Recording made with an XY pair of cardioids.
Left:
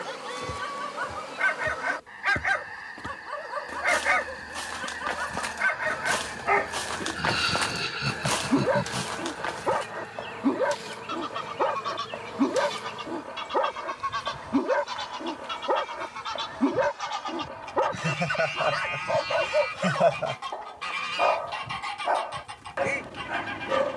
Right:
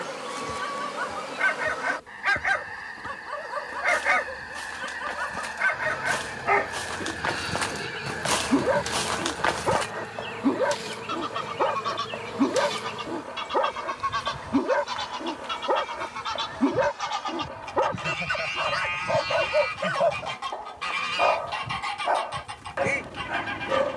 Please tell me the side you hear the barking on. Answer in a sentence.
In this clip you hear the barking in the centre.